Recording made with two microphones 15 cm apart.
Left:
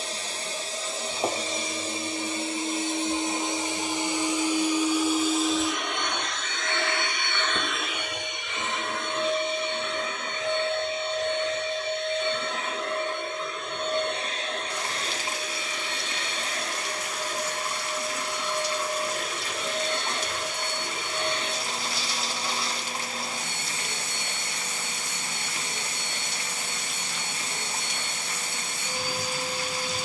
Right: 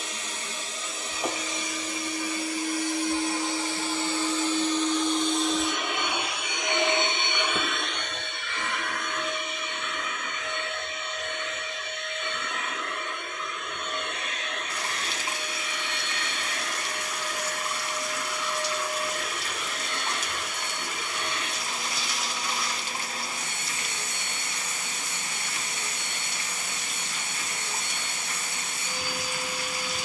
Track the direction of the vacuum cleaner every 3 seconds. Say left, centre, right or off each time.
left, centre, centre, left, left, left, left, left, left, left.